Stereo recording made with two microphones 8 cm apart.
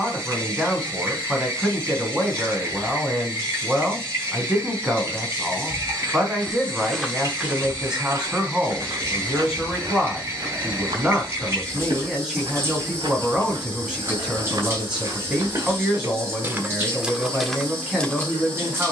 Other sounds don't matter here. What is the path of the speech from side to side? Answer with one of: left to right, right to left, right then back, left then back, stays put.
stays put.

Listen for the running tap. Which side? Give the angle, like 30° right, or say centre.
30° right.